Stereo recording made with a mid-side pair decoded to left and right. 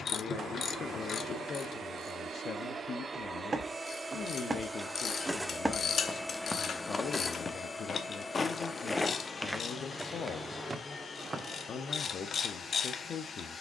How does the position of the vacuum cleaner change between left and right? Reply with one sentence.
In this clip you hear the vacuum cleaner move from right to left.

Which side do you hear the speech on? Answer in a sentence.
In this clip you hear the speech on the left.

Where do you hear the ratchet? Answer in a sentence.
In this clip you hear the ratchet on the left.